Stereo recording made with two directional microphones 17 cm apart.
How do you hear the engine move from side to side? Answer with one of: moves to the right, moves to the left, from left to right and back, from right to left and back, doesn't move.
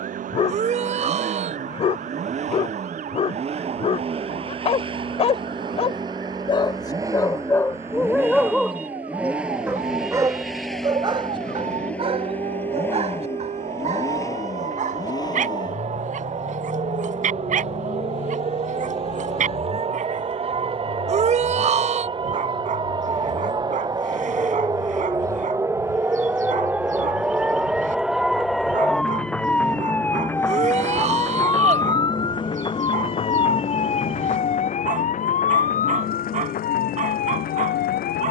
moves to the left.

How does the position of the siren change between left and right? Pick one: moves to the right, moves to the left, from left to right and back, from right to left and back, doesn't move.
moves to the left.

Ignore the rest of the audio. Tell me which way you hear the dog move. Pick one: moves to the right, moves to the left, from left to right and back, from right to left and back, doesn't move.
moves to the right.